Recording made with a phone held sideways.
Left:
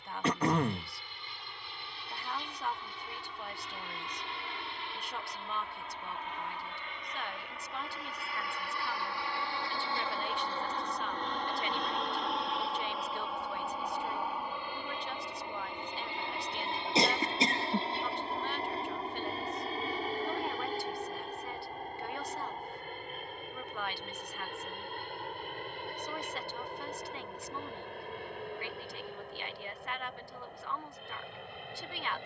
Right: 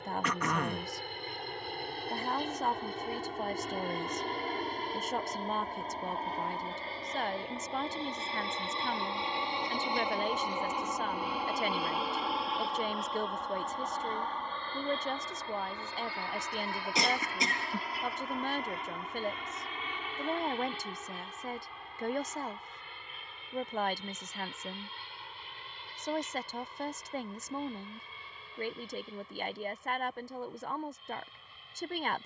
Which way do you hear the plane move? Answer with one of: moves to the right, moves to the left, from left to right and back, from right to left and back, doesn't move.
moves to the left.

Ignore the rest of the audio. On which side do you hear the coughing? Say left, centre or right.
left.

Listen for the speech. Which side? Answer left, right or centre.
right.